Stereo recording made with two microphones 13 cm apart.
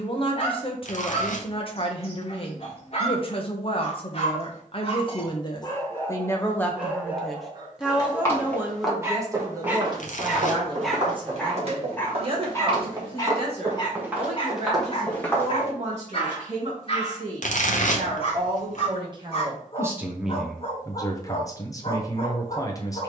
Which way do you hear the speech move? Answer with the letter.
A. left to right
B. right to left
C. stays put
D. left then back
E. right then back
E.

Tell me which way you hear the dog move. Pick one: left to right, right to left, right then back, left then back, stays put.
right then back.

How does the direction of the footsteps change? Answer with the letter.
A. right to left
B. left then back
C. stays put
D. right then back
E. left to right
D.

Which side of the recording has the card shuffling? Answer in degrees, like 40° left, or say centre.
60° left.